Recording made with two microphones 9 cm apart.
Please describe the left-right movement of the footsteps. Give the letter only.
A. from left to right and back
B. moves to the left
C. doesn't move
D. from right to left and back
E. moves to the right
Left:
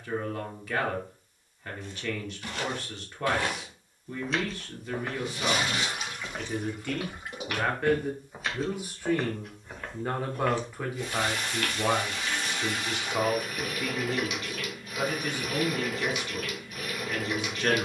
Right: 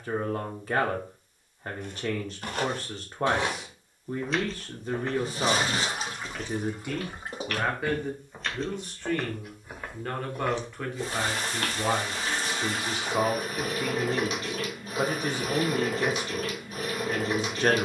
D.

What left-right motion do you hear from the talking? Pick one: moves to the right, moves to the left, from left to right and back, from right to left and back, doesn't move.
from right to left and back.